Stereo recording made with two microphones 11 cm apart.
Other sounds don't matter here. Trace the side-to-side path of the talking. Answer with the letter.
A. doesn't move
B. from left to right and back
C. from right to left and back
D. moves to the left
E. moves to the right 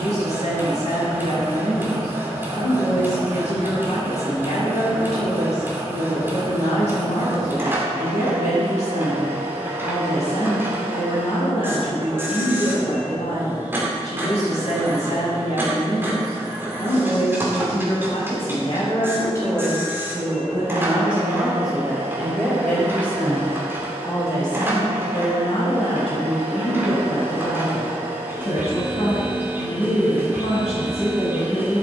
B.